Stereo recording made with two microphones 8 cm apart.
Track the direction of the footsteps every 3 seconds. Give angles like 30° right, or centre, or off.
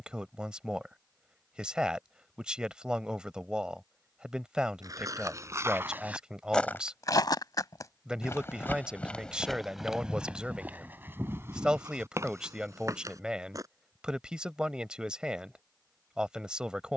off, 40° right, 30° left, 10° right, 40° right, off.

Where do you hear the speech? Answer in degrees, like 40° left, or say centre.
10° right.